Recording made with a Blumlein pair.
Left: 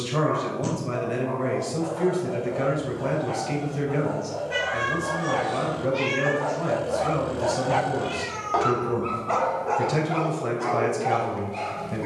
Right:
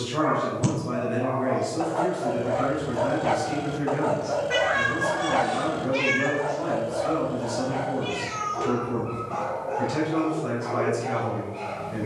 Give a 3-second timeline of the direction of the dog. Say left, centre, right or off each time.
right, right, left, left.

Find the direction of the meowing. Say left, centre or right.
right.